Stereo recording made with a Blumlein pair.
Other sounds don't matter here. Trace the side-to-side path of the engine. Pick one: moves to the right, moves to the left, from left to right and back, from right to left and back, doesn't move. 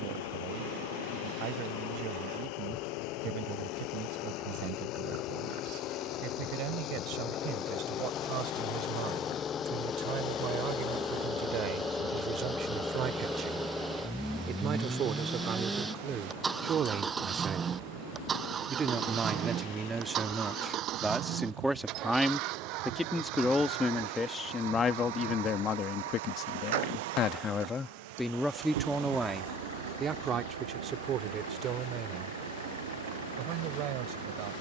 moves to the right.